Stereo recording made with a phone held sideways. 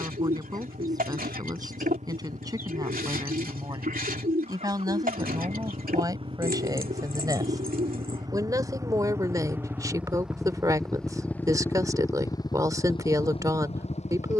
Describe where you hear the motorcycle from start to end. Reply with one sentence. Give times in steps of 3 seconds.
You can hear the motorcycle on the right from 0 s, in the centre from 9 s and on the left from 12 s.